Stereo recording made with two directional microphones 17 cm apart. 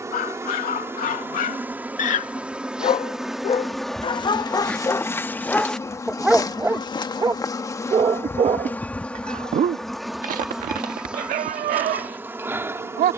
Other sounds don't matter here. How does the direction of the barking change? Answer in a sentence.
You can hear the barking go from the left side to the right.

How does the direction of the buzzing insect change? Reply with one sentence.
In this clip you hear the buzzing insect go left and come back.